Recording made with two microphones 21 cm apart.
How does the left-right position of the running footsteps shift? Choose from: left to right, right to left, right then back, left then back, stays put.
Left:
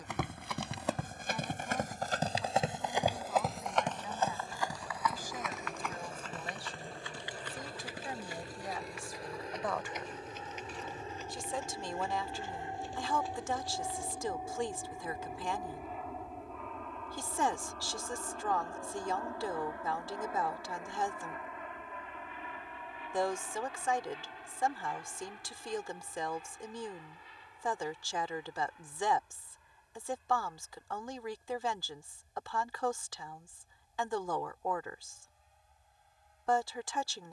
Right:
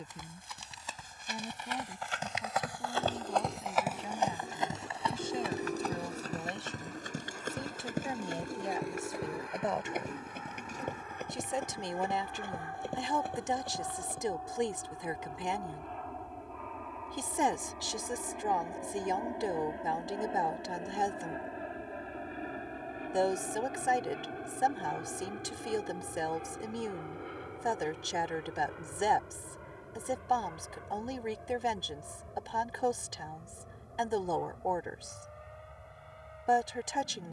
left to right.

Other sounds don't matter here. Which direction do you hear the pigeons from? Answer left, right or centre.
right.